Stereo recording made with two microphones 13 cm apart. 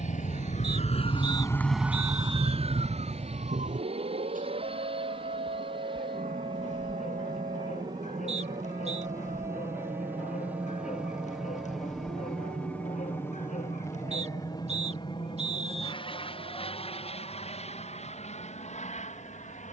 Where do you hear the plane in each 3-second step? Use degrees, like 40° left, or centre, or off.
60° right, 50° right, 30° right, 10° right, 20° left, 40° left, 50° left.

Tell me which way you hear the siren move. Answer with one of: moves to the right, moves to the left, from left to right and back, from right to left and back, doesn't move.
moves to the right.